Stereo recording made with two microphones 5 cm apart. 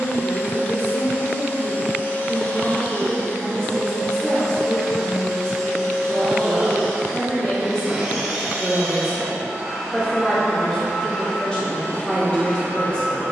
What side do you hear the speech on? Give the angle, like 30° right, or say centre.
20° left.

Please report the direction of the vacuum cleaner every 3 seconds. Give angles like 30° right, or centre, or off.
40° left, 10° left, centre, 10° left, 30° left.